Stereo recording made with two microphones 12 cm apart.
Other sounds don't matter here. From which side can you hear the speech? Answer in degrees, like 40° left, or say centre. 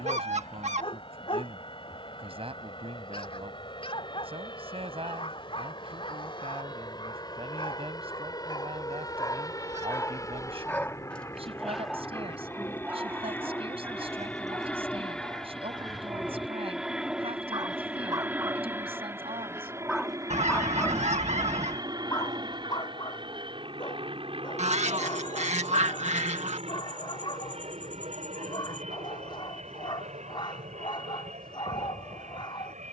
50° right.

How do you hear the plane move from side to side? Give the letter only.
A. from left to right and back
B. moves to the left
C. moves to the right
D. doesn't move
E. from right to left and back
C.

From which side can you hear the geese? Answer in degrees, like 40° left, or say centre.
70° right.